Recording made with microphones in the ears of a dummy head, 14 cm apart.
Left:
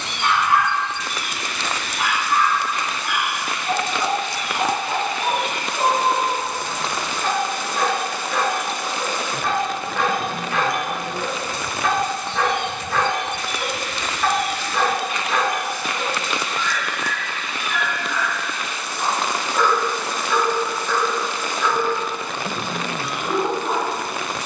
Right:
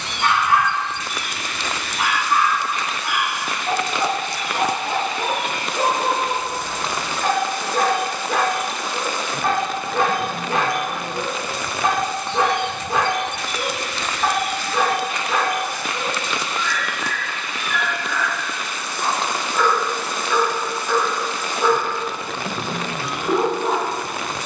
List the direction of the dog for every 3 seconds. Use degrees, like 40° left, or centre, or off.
60° right, 60° right, 50° right, 40° right, 20° right, centre, centre, 40° right.